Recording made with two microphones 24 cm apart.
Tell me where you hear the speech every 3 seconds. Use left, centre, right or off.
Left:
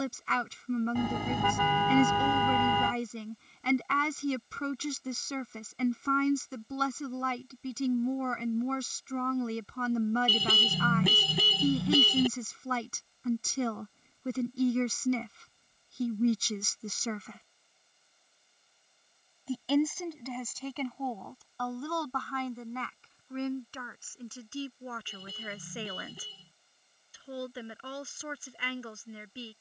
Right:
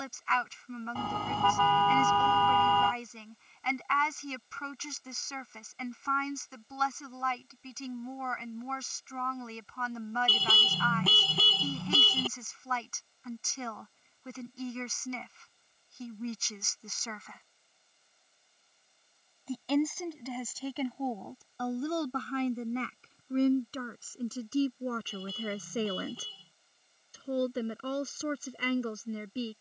left, left, left, left, left, left, centre, right, right, right.